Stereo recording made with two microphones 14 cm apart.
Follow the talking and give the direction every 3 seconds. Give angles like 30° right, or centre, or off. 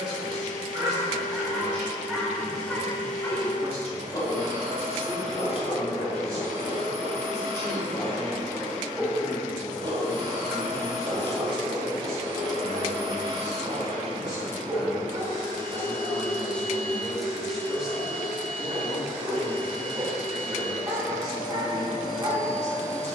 40° right, 40° right, 40° right, 10° left, 40° left, 10° left, 30° right, 40° right.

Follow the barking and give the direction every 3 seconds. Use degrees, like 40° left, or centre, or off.
10° right, 40° left, 20° left, 30° right, 40° right, 40° right, 40° right, 40° right.